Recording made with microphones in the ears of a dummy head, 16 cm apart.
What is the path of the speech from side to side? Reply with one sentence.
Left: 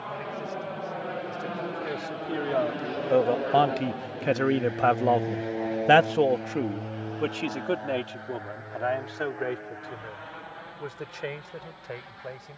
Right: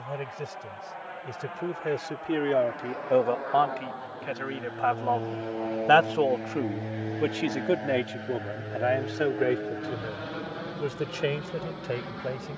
In this clip you hear the speech go left and come back.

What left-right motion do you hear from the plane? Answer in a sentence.
You can hear the plane move from left to right.